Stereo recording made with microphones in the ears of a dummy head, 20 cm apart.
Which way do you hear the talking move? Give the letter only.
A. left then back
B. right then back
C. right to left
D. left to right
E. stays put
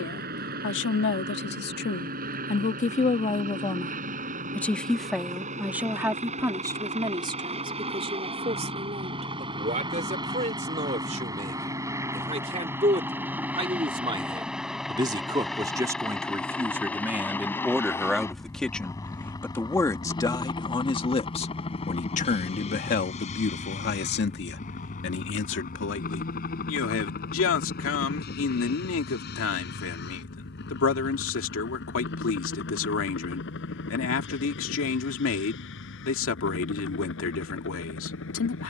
B.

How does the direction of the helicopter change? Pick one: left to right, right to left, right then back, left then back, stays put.
right to left.